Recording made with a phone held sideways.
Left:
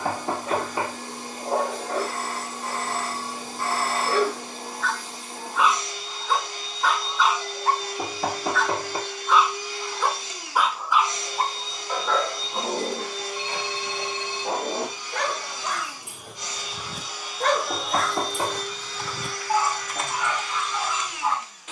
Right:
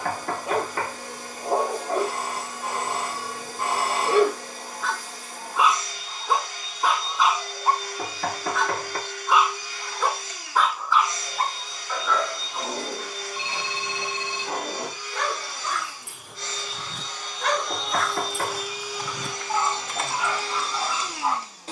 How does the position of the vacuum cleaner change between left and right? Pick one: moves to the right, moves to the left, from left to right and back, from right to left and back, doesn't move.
moves to the right.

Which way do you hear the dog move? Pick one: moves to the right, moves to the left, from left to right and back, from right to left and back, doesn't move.
from right to left and back.